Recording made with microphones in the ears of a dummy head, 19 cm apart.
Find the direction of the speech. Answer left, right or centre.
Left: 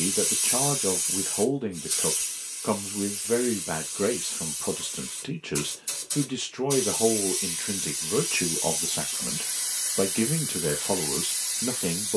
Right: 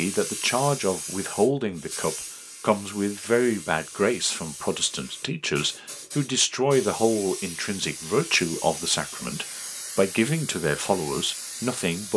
right.